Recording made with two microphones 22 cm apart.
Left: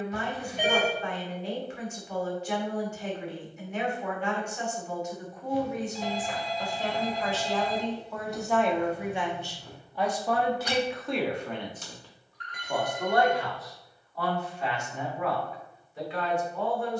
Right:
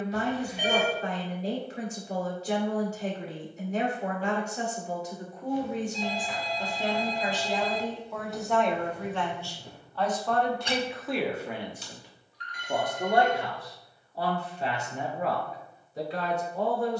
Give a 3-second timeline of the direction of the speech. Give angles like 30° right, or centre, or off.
40° right, 40° right, 10° right, centre, 30° right, 40° right.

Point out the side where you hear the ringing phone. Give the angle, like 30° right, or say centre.
50° left.